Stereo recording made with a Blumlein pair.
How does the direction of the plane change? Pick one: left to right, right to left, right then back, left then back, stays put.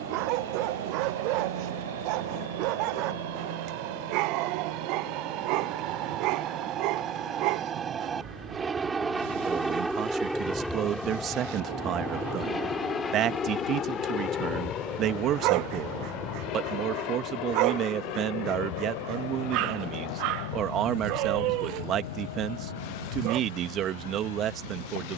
right to left.